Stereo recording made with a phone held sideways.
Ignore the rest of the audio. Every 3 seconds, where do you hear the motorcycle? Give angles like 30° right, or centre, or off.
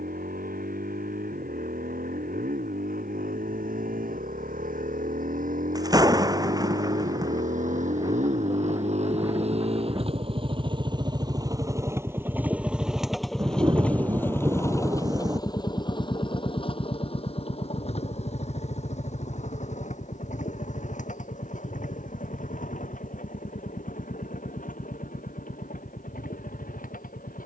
80° right, 70° right, 60° right, 40° right, centre, 30° left, 50° left, 60° left, 60° left.